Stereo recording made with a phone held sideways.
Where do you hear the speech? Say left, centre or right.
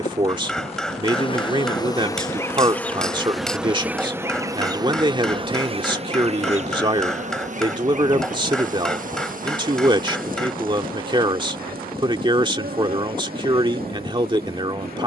right.